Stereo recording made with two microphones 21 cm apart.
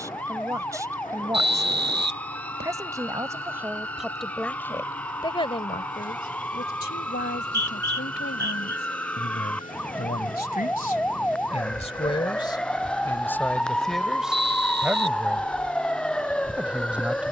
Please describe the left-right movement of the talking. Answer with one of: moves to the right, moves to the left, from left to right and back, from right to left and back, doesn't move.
from right to left and back.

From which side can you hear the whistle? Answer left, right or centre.
right.